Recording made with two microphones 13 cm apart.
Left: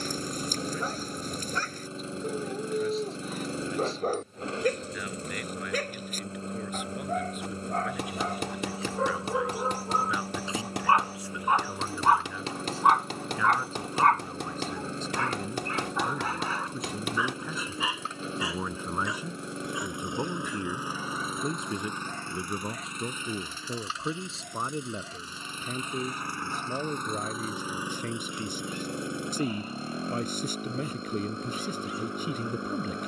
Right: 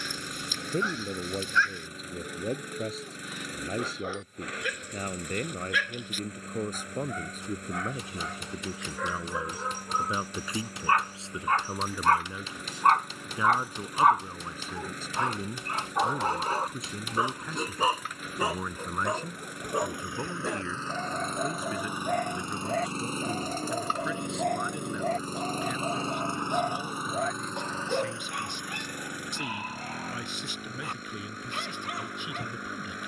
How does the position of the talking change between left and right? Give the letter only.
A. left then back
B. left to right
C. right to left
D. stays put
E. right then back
C.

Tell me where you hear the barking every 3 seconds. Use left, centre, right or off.
left, left, left, left, centre, right, right, right, right, right, right.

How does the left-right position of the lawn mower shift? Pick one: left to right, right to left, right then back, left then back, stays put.
right then back.